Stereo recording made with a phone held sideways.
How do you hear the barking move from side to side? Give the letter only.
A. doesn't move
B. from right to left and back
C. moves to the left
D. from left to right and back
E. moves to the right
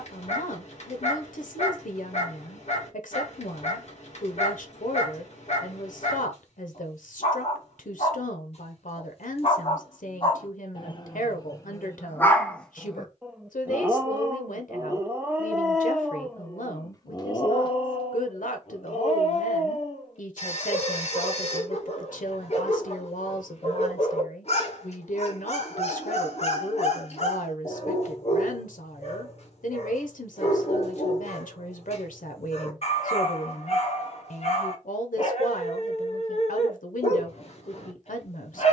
D.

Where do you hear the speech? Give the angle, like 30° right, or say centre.
80° left.